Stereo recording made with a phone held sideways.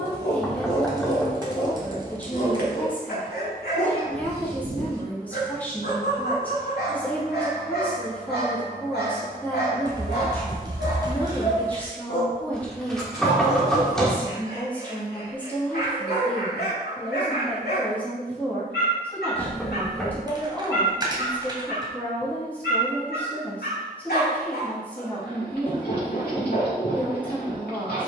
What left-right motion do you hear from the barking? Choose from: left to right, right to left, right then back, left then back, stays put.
stays put.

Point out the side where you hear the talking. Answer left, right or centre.
centre.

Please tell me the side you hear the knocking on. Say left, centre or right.
centre.